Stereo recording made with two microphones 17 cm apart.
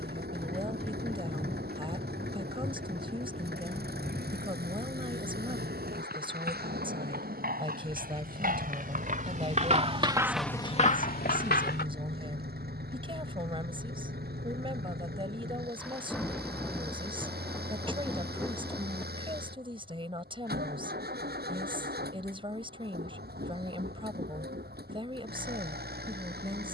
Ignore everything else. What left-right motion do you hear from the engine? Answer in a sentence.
In this clip you hear the engine stay put.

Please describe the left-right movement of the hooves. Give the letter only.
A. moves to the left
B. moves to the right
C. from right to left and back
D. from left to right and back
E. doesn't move
A.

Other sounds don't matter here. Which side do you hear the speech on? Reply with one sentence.
You can hear the speech on the right.